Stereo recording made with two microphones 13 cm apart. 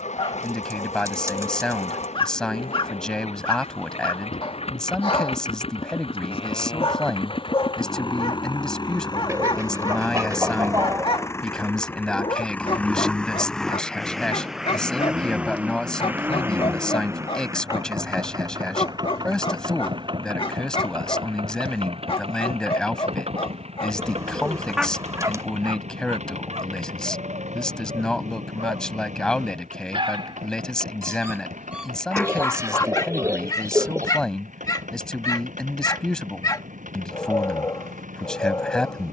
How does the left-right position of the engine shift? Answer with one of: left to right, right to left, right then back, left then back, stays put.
left to right.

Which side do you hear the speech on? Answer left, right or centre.
centre.